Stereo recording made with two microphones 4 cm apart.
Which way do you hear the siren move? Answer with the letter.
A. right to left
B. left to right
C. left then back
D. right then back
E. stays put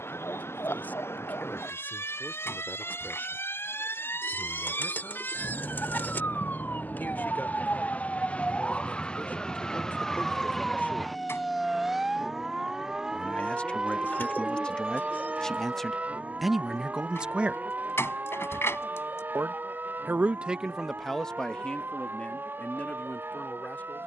B.